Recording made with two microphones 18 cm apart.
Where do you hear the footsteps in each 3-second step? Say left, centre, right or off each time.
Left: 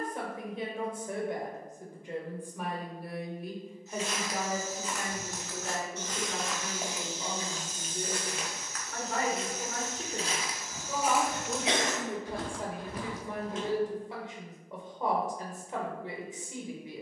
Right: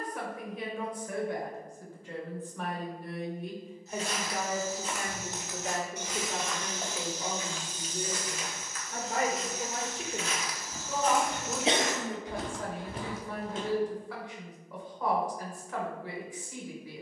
off, right, left, left, right, off.